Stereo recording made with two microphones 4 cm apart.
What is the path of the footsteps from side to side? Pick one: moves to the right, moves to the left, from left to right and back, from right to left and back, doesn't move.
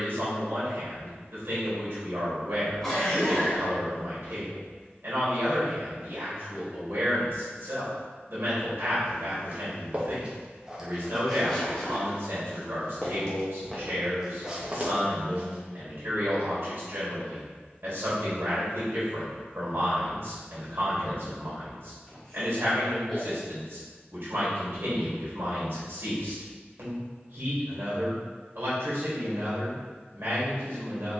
from right to left and back.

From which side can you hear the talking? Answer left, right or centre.
right.